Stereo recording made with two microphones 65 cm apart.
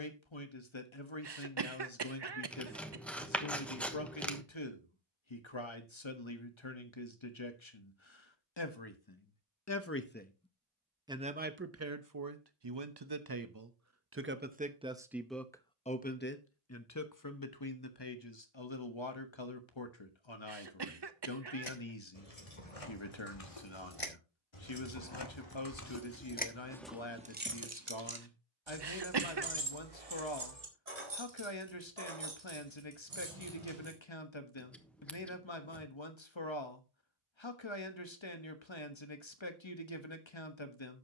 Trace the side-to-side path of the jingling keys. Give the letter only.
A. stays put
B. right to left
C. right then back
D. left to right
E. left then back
D.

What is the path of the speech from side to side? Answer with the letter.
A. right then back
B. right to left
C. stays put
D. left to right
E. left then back
A.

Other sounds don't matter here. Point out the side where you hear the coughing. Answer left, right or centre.
right.